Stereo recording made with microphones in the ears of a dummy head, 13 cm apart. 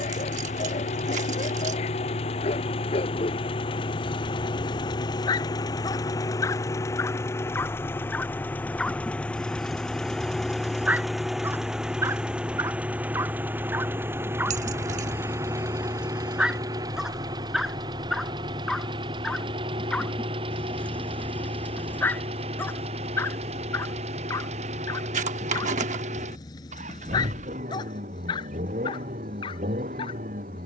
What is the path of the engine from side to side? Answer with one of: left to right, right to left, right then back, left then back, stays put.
left to right.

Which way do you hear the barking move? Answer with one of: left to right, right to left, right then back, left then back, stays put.
right then back.